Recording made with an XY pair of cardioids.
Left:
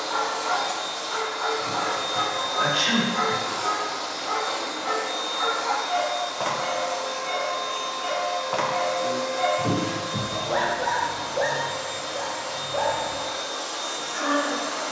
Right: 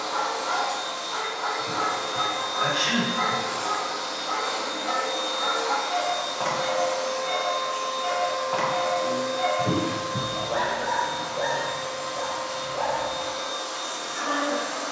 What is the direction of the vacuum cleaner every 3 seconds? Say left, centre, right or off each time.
left, centre, centre, left, left.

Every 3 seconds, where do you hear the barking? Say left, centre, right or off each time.
left, left, centre, left, left.